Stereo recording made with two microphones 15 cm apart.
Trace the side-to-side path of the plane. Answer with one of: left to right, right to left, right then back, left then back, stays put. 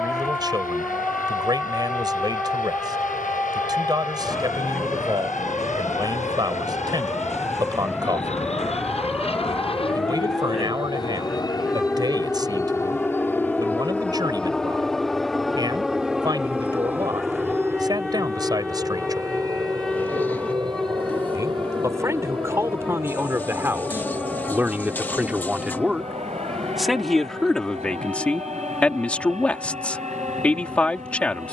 left to right.